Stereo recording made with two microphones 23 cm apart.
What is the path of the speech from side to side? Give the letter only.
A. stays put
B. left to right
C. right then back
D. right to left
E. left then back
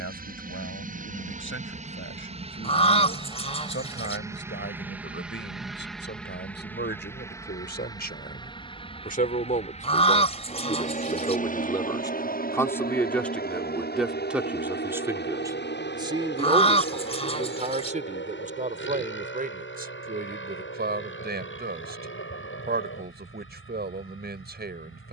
B.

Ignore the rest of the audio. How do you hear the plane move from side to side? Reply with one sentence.
In this clip you hear the plane move to the left.